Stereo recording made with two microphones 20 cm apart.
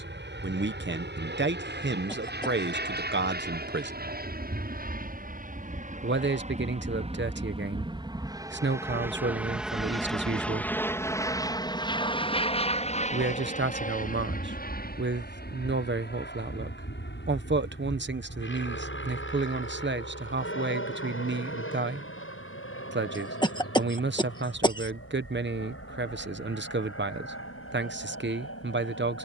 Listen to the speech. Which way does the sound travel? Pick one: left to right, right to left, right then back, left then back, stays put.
stays put.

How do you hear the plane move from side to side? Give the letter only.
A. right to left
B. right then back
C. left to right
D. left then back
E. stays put
A.